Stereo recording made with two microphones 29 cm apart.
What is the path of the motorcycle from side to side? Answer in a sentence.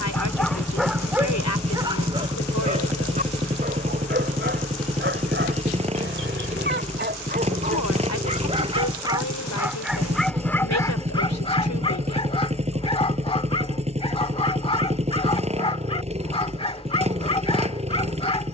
In this clip you hear the motorcycle stay in one place.